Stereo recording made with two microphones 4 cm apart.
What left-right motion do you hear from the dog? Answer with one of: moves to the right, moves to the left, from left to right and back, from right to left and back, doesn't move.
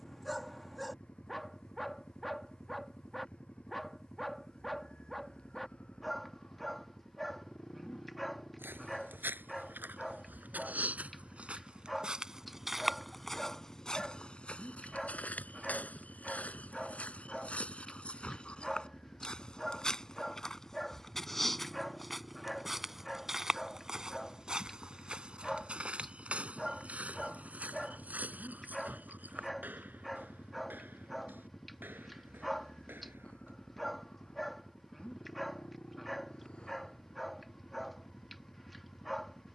doesn't move.